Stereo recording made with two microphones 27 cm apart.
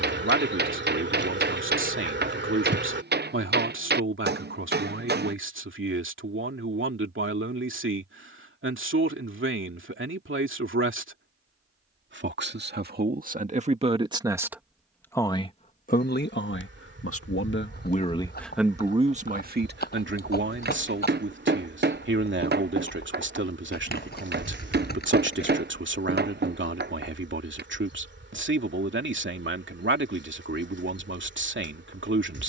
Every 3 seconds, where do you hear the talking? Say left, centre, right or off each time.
right, right, right, right, right, left, right, right, right, right, right.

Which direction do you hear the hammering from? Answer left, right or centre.
right.